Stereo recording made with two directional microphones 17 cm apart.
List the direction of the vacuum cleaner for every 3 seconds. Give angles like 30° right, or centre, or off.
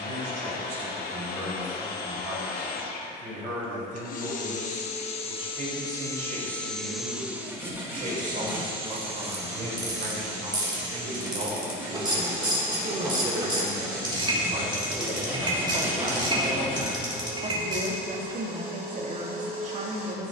60° left, 50° left, 10° right, 40° right, 60° right, 60° right, 60° right.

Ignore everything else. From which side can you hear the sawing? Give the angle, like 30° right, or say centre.
10° right.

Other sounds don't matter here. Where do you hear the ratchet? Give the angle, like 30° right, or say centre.
30° right.